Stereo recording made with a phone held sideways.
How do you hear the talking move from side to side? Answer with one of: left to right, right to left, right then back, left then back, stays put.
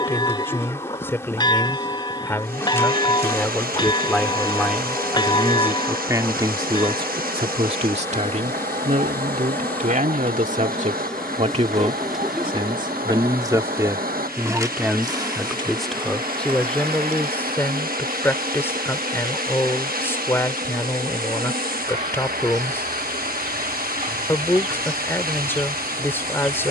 right then back.